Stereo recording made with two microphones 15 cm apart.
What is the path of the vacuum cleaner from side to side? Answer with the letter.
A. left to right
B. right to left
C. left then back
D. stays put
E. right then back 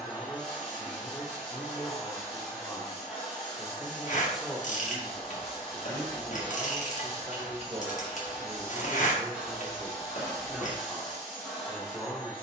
D.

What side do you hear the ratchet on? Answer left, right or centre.
left.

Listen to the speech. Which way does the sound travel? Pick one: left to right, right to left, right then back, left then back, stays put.
right then back.